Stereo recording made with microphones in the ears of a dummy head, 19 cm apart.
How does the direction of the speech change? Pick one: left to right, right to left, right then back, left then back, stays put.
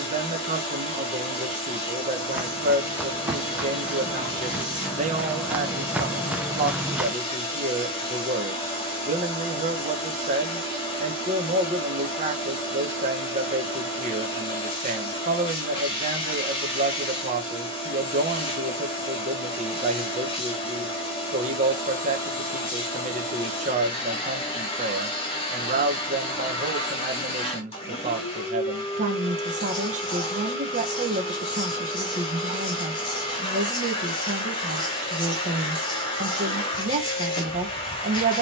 stays put.